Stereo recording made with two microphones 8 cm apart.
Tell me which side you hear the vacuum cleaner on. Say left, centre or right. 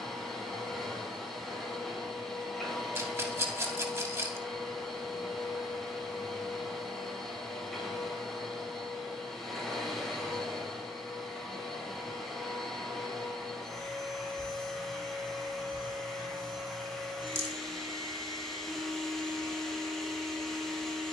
centre.